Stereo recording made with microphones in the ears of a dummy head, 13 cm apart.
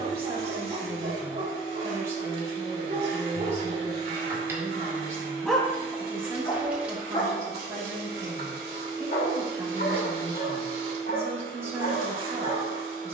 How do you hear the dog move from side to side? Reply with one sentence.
In this clip you hear the dog travel towards the left.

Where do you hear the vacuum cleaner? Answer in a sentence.
You can hear the vacuum cleaner on the right.